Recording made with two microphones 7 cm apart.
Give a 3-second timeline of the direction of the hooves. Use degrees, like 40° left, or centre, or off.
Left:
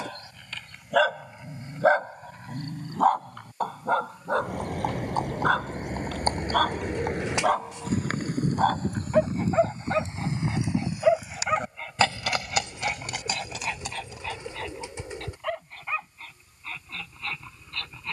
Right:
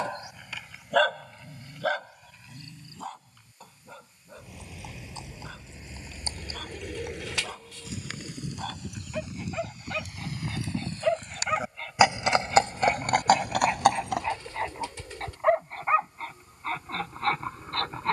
off, 50° left, 40° left, 20° left, 50° right, off.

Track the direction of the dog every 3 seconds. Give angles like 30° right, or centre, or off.
30° left, 70° left, 60° left, 30° left, 20° right, 40° right.